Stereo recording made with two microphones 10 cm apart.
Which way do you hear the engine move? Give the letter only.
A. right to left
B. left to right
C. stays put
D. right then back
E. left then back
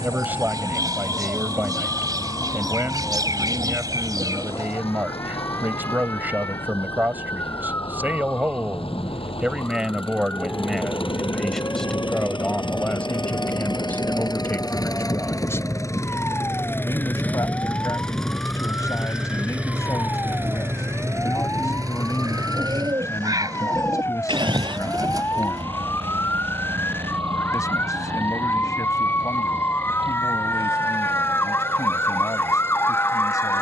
B.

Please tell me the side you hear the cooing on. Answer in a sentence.
In this clip you hear the cooing on the right.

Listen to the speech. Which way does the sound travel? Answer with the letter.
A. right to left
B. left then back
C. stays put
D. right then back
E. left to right
A.